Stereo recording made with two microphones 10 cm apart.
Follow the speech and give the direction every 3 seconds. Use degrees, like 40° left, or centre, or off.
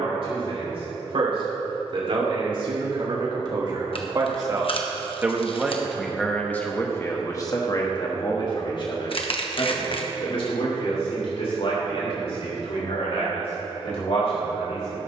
60° right, 30° right, 30° left, 70° left, 80° left.